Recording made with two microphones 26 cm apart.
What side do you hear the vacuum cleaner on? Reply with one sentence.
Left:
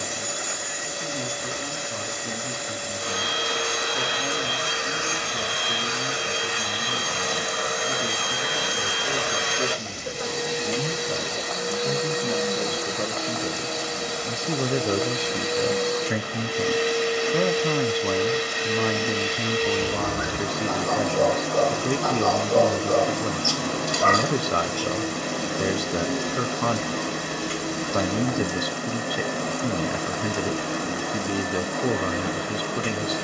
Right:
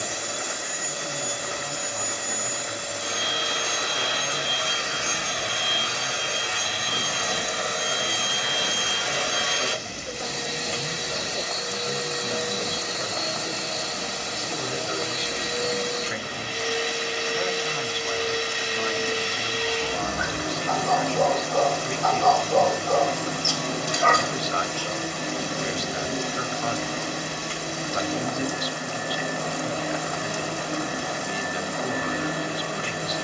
In this clip you hear the vacuum cleaner on the left.